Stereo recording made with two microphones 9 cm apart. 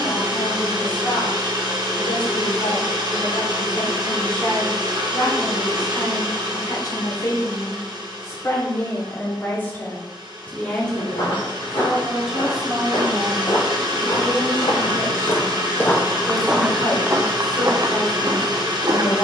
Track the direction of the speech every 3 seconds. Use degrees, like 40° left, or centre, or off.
70° left, 60° left, 40° left, 20° left, centre, 50° left, 60° left.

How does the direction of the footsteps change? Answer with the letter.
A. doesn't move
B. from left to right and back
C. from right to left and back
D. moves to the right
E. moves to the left
D.